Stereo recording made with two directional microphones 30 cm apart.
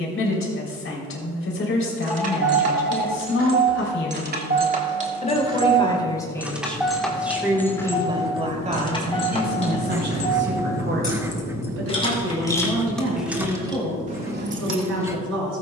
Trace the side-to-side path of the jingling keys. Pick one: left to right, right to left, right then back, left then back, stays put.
left then back.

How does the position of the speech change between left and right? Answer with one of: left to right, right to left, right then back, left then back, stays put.
left to right.